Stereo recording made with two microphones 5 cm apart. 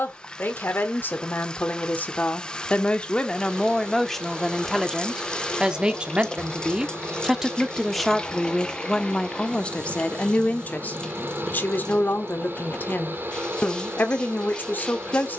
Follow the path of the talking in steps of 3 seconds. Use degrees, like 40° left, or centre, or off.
40° left, centre, 10° right, 30° left, 40° left.